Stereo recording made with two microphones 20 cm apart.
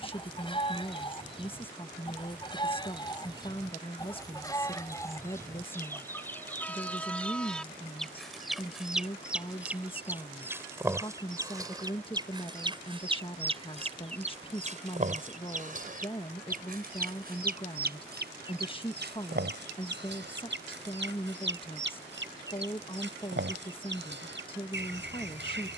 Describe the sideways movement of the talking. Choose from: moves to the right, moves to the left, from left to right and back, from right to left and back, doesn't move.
doesn't move.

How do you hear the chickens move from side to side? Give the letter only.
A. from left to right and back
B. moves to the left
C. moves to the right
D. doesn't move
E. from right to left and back
C.